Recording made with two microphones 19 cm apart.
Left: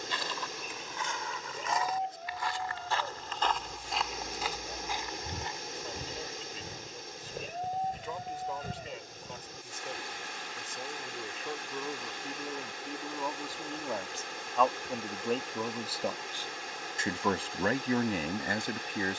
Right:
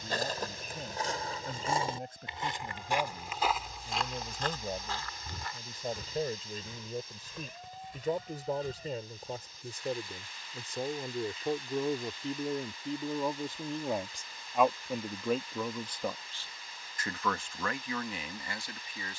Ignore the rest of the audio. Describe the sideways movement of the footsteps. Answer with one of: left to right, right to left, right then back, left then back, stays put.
right to left.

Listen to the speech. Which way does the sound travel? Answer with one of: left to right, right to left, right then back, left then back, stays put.
right to left.